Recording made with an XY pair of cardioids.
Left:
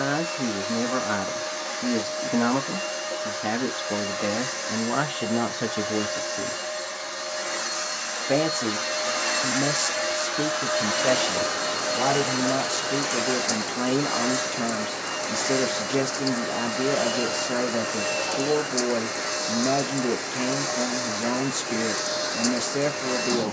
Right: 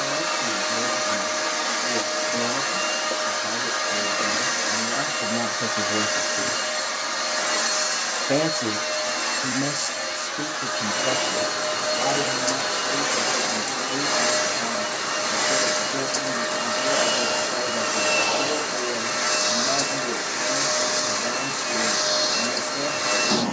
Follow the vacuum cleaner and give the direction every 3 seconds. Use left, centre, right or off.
right, right, right, centre, right, right, right, right.